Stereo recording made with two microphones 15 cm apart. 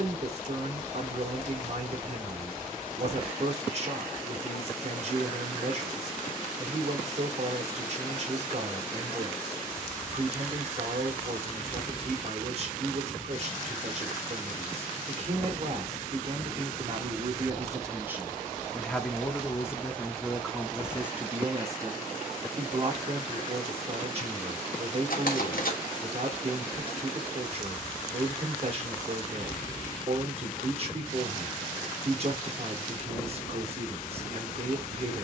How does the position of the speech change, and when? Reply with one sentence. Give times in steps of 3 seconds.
You can hear the speech on the right from 0 s, in the centre from 18 s and on the right from 21 s.